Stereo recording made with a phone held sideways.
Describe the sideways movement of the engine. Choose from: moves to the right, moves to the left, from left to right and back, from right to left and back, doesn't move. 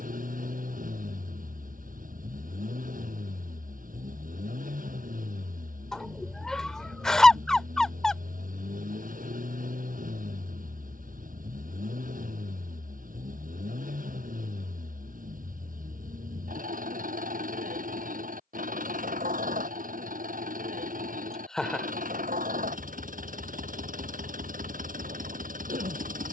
doesn't move.